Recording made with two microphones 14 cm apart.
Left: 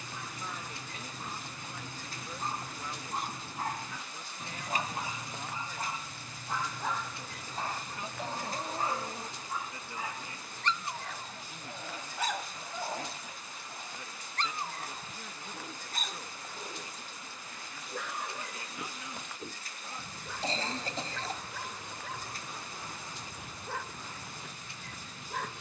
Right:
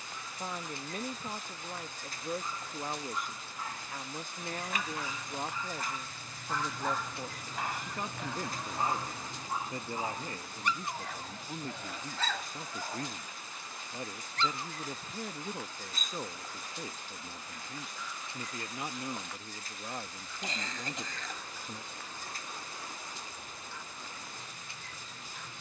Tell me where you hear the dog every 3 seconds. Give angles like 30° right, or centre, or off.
60° left, 40° left, 10° right, 10° right, 30° left, 60° left, 70° left, 70° left, 70° left.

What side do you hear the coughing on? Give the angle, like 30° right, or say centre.
30° left.